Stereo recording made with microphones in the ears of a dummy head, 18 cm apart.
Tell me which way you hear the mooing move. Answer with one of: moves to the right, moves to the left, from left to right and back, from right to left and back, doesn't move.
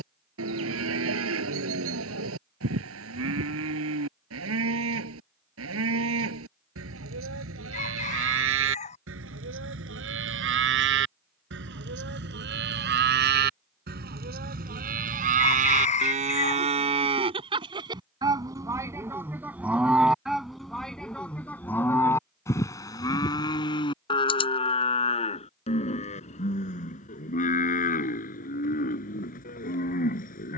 moves to the left.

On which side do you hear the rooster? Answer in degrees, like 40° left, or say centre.
30° left.